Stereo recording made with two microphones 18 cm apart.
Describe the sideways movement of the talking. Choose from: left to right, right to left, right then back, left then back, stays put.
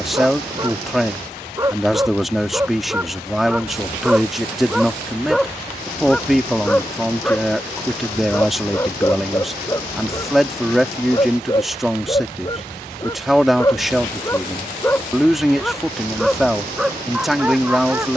stays put.